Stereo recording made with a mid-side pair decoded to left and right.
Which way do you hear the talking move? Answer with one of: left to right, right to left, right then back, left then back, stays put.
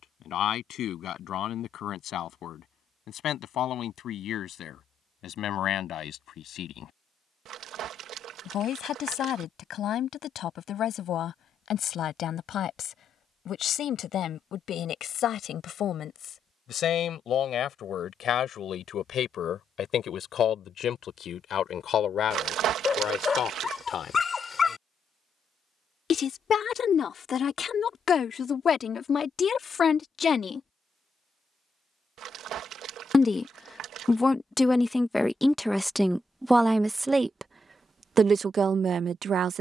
left to right.